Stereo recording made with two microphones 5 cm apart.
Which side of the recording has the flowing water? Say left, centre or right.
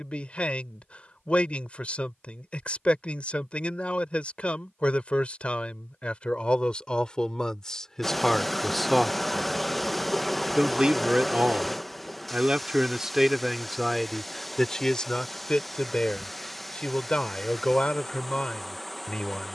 centre.